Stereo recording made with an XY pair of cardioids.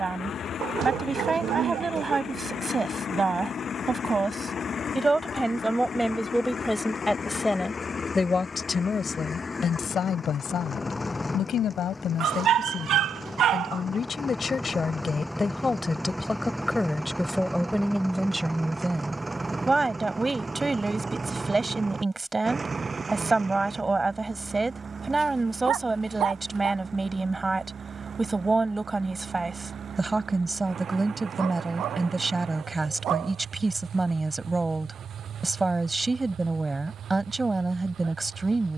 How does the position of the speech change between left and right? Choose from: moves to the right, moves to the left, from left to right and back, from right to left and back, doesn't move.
from right to left and back.